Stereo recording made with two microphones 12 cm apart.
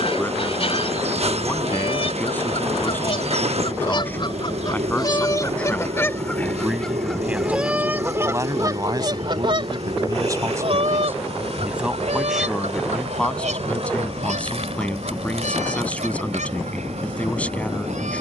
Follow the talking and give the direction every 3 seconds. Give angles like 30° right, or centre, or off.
20° left, 10° left, 10° right, 30° right, 10° left, 10° left.